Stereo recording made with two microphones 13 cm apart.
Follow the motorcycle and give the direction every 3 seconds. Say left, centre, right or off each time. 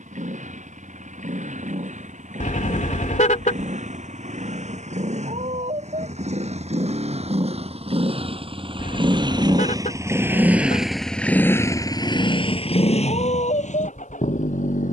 right, right, right, centre, left.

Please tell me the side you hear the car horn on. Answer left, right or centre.
left.